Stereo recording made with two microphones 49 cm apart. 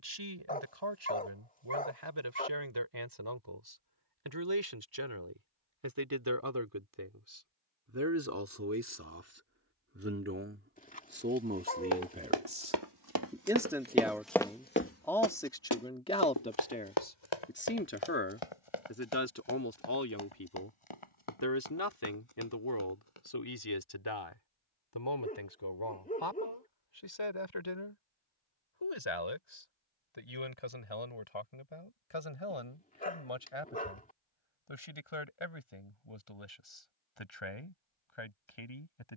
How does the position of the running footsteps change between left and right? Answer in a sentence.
In this clip you hear the running footsteps travel towards the left.